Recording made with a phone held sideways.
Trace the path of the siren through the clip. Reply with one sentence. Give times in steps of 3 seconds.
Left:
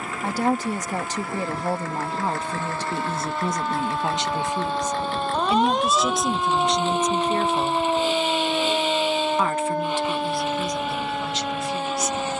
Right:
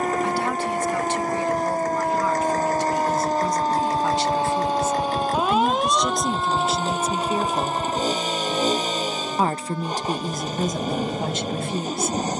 In this clip you hear the siren on the right from 0 s and on the left from 6 s.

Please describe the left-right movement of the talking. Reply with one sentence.
In this clip you hear the talking travel towards the right.